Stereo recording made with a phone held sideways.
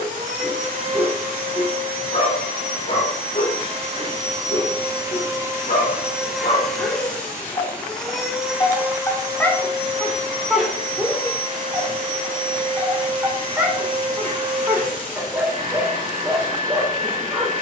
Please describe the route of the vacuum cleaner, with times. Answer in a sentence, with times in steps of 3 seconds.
You can hear the vacuum cleaner on the right from 0 s, in the centre from 6 s and on the right from 9 s.